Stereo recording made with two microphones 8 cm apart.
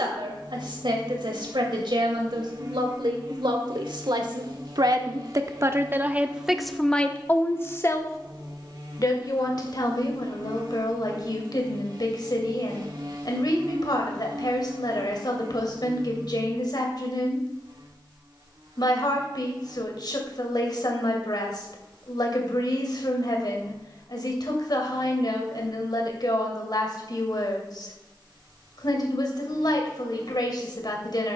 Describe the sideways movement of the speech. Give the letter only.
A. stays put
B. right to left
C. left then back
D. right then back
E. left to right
B.